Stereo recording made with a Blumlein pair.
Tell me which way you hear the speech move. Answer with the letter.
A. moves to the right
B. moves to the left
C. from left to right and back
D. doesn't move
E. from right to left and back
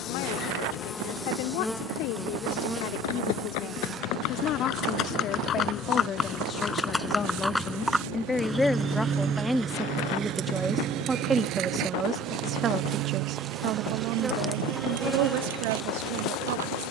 A.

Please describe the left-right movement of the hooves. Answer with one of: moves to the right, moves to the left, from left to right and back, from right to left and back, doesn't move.
moves to the right.